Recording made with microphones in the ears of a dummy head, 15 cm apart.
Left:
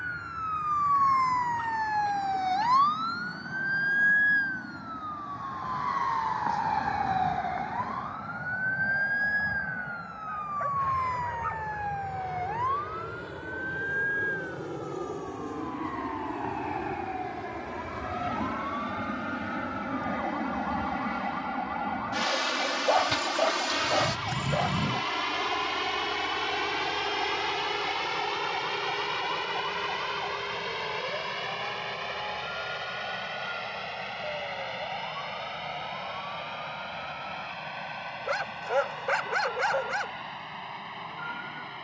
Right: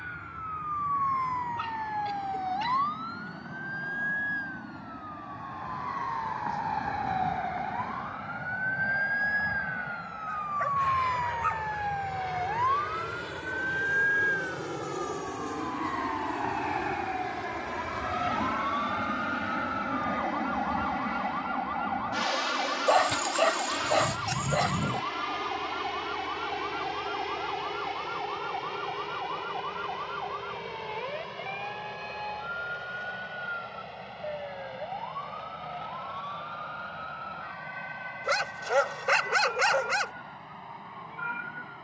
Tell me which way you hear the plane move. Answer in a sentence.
In this clip you hear the plane move from right to left.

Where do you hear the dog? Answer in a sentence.
In this clip you hear the dog on the right.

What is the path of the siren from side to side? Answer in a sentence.
In this clip you hear the siren go from the left side to the right.